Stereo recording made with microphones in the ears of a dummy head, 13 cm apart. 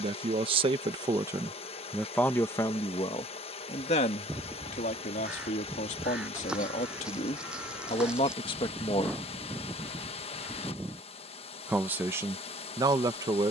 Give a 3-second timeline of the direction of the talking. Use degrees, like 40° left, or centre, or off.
10° right, 50° left, 40° left, centre, 20° right.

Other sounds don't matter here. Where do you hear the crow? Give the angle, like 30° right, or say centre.
10° right.